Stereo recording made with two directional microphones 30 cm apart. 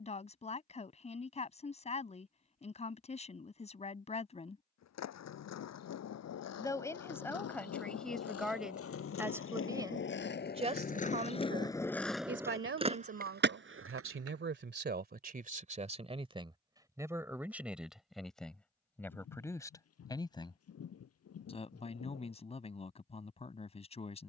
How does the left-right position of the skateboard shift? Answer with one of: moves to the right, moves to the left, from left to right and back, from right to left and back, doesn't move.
moves to the right.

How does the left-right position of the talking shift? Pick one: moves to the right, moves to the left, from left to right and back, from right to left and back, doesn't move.
from left to right and back.